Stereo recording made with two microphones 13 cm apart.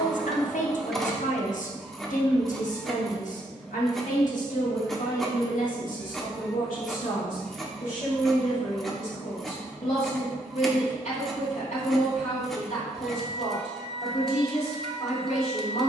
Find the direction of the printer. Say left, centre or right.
centre.